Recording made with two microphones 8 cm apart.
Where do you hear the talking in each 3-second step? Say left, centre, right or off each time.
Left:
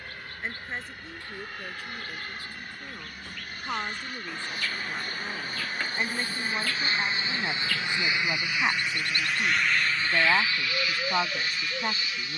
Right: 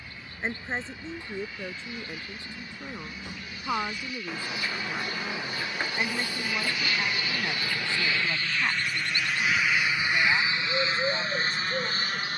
right, centre, centre, left.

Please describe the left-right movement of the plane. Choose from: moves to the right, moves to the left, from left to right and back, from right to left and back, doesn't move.
moves to the right.